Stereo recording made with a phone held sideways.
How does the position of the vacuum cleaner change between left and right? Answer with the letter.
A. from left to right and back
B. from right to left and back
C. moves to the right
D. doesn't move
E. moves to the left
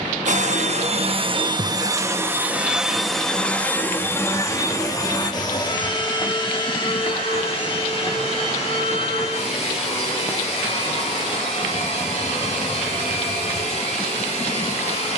E.